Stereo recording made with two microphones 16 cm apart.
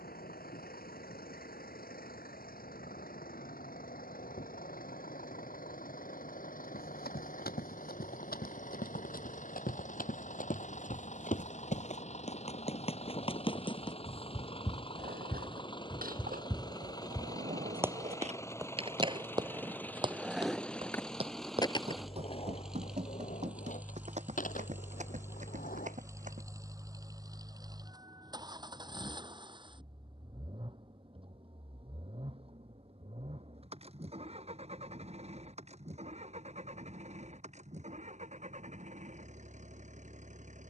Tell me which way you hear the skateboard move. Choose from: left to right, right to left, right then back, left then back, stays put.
right to left.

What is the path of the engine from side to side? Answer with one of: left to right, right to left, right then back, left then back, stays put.
left to right.